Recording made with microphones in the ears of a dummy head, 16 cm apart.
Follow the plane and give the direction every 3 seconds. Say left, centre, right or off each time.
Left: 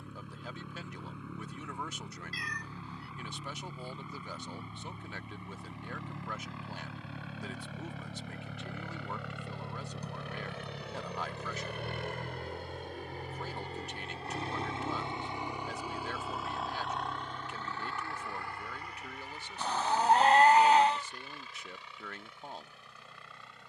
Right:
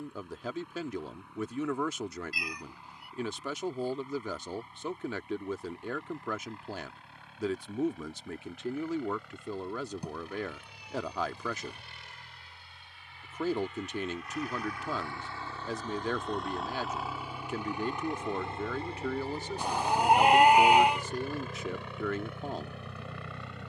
left, left, left, left, left, centre, right, right.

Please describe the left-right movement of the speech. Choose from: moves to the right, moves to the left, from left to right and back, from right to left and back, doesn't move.
doesn't move.